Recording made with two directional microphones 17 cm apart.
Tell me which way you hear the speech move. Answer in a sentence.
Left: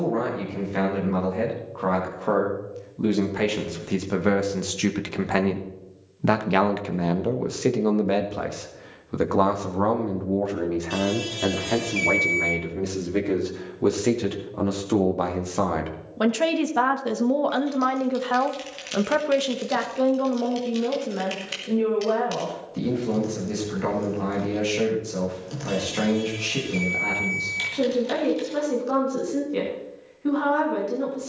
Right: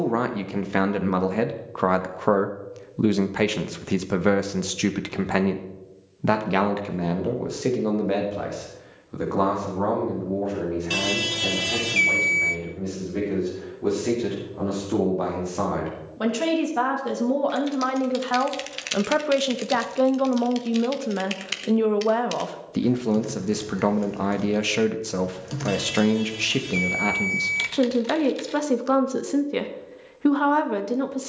You can hear the speech go left and come back.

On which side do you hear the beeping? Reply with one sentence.
In this clip you hear the beeping on the right.